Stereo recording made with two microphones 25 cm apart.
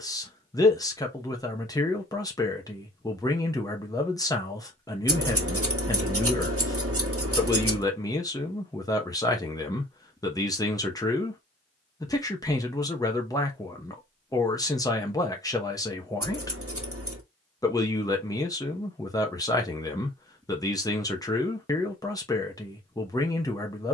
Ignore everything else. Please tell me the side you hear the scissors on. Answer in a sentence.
You can hear the scissors on the right.